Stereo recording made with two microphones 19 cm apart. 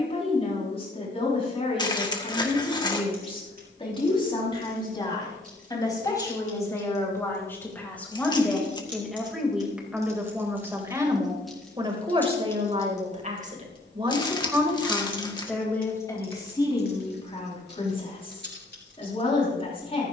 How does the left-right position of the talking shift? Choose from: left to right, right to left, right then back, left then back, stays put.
right then back.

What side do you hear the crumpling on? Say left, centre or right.
left.